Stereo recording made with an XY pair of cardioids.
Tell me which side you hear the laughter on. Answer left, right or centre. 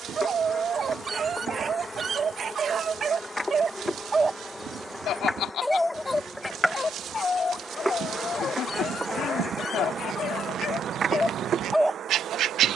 left.